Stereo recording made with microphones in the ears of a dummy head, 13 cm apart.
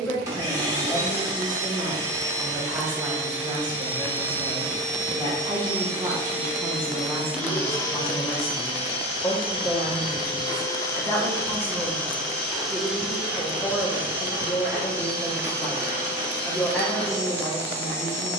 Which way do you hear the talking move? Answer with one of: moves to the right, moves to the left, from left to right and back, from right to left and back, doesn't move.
from left to right and back.